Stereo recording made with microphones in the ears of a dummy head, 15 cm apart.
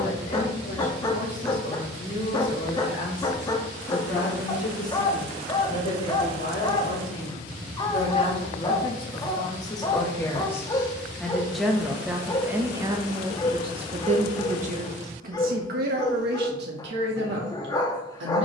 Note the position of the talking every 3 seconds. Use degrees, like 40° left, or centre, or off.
50° left, 50° left, 40° left, 10° left, 30° right, 70° right.